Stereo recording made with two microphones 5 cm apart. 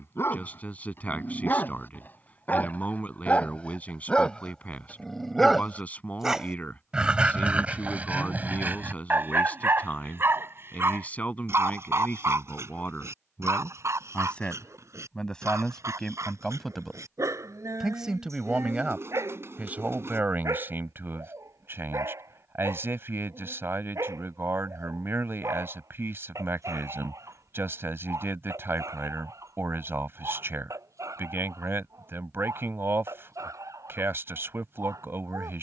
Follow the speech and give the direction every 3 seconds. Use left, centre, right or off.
left, left, left, left, left, centre, right, right, right, right, right, right.